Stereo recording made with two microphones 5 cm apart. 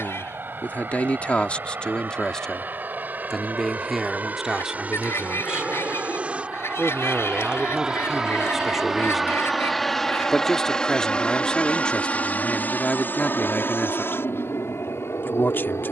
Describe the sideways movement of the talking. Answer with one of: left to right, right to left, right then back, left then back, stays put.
right then back.